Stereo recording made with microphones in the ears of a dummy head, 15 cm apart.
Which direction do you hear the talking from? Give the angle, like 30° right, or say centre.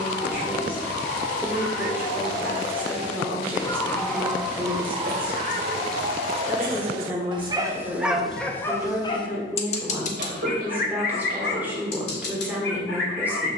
10° right.